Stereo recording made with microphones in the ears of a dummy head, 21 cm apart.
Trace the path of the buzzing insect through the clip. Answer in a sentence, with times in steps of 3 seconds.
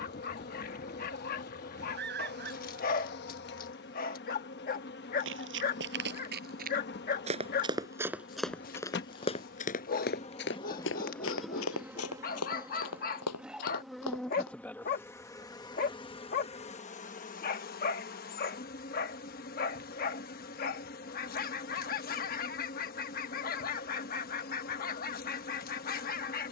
In this clip you hear the buzzing insect on the left from 0 s, in the centre from 12 s and on the left from 15 s.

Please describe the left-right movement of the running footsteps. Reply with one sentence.
You can hear the running footsteps go from the right side to the left.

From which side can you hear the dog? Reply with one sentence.
You can hear the dog on the left.